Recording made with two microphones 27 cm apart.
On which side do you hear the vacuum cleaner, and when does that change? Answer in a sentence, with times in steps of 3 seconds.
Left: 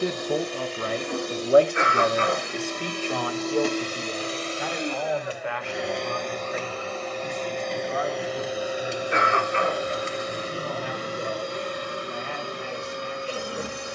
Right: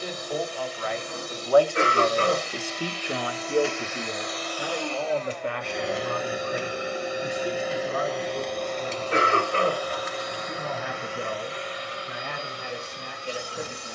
In this clip you hear the vacuum cleaner on the left from 0 s, in the centre from 6 s and on the left from 9 s.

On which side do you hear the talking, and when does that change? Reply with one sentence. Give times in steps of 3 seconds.
You can hear the talking on the left from 0 s and on the right from 3 s.